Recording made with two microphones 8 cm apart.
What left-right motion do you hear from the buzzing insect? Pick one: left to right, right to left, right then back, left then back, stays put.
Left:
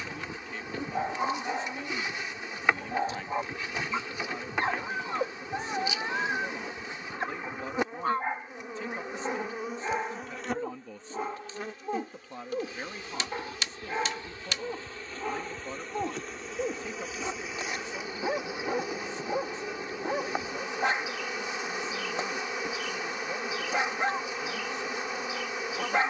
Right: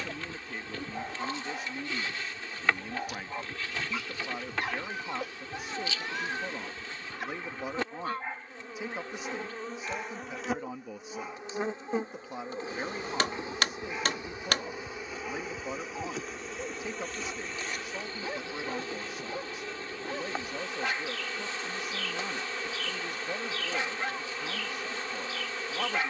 right then back.